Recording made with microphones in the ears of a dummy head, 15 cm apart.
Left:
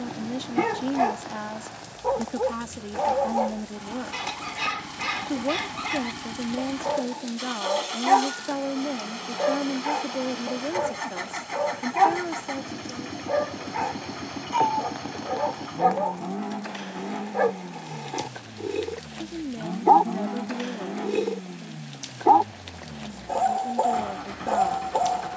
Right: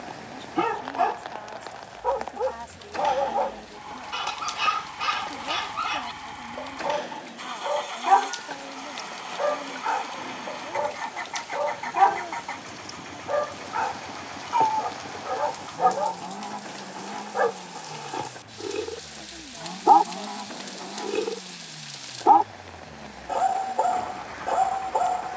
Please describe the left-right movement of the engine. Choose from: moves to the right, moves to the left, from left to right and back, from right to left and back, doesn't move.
doesn't move.